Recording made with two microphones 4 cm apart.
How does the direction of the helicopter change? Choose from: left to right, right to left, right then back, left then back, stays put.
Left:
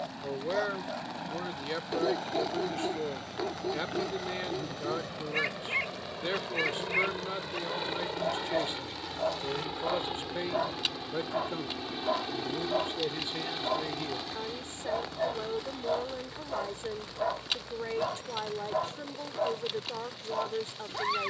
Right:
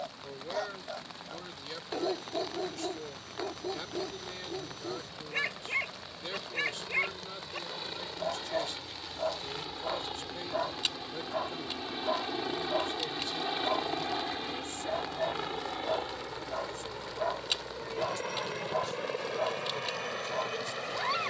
left to right.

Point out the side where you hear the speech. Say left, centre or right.
left.